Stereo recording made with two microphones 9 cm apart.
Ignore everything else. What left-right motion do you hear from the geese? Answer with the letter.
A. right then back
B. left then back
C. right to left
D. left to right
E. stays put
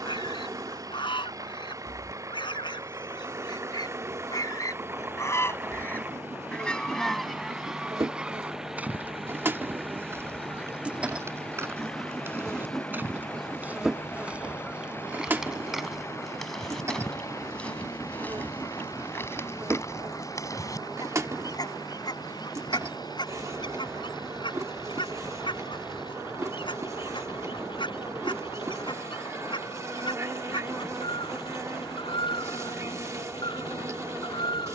A.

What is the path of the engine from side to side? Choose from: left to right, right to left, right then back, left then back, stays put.
right to left.